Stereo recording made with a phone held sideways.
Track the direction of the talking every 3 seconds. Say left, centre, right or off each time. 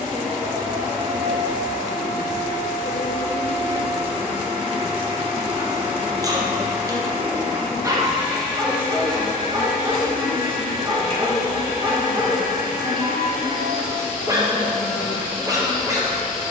right, right, centre, left, left, right.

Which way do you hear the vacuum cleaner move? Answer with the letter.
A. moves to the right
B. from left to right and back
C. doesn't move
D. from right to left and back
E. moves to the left
C.